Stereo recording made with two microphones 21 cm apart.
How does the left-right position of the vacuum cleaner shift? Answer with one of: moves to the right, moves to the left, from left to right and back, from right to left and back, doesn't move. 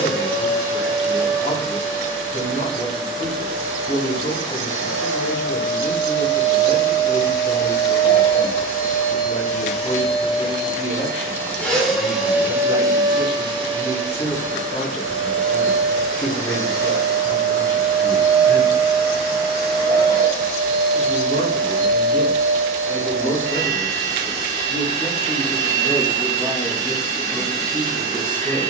moves to the right.